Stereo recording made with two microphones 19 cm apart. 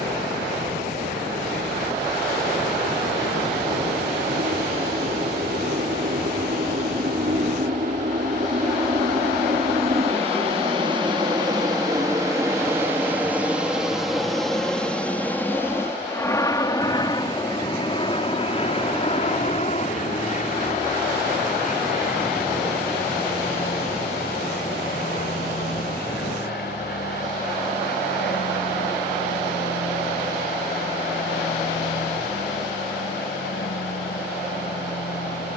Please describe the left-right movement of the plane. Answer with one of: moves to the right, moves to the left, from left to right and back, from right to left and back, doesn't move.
moves to the left.